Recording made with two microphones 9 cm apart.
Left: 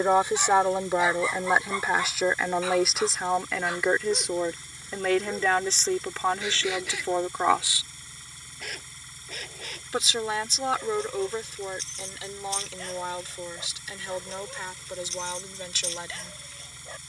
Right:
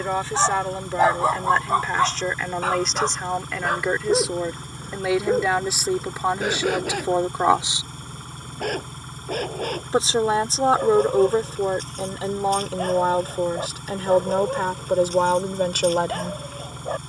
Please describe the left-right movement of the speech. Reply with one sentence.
In this clip you hear the speech go from the left side to the right.